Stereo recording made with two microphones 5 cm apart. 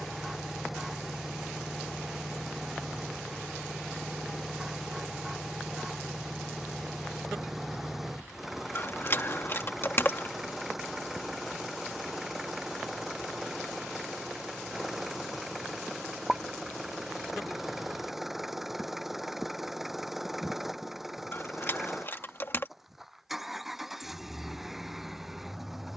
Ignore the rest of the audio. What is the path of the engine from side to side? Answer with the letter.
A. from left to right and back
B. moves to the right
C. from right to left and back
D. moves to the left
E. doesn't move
E.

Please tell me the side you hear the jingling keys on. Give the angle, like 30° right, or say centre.
50° left.